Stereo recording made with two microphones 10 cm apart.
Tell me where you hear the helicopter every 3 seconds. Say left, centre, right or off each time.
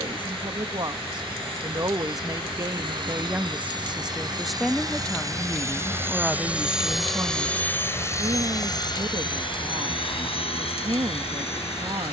right, right, centre, left.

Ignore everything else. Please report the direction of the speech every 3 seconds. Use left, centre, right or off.
right, centre, right, right.